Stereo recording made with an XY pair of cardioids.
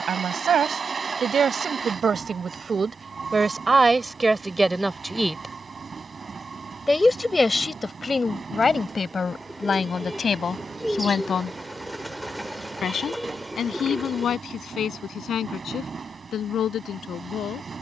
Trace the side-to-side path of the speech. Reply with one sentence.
In this clip you hear the speech move to the left.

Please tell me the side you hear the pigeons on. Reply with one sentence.
In this clip you hear the pigeons in the centre.